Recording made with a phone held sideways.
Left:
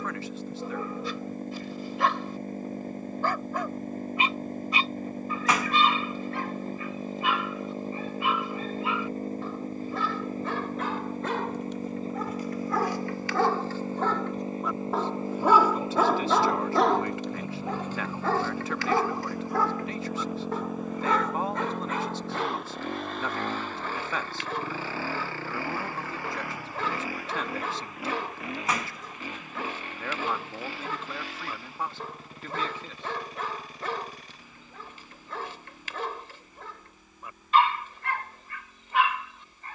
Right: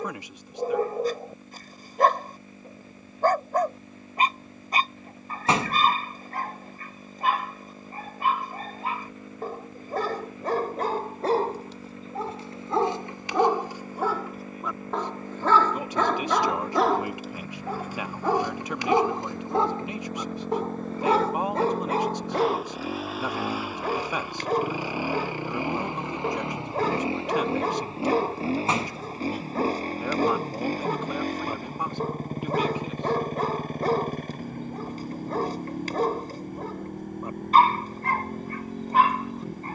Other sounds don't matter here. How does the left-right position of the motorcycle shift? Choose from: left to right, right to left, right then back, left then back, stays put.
left to right.